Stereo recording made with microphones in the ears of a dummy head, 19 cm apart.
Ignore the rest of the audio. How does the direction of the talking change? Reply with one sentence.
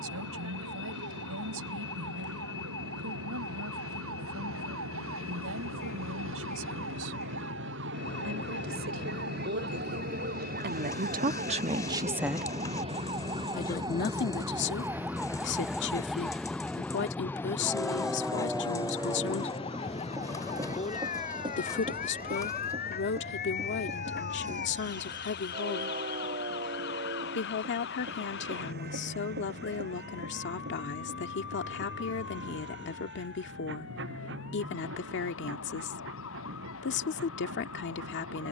In this clip you hear the talking go from the right side to the left.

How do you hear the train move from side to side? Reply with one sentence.
In this clip you hear the train move to the right.